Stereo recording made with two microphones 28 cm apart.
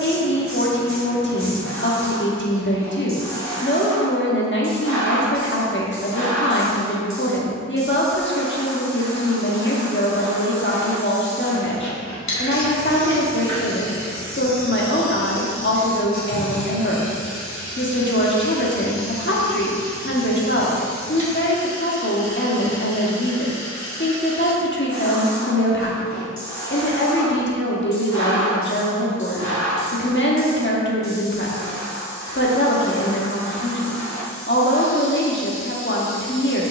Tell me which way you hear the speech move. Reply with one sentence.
In this clip you hear the speech stay put.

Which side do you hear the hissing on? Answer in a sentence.
In this clip you hear the hissing on the left.